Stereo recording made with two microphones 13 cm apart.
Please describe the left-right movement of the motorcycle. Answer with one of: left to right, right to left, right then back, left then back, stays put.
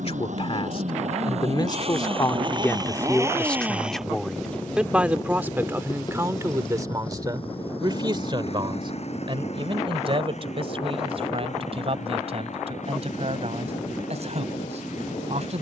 right to left.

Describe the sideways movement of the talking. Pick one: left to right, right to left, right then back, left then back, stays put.
left to right.